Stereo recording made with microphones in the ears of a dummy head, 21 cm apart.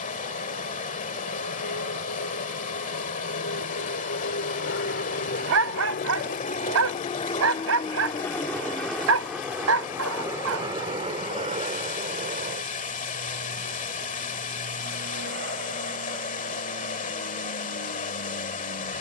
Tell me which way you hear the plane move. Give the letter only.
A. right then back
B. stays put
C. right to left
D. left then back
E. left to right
E.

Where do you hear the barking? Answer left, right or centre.
right.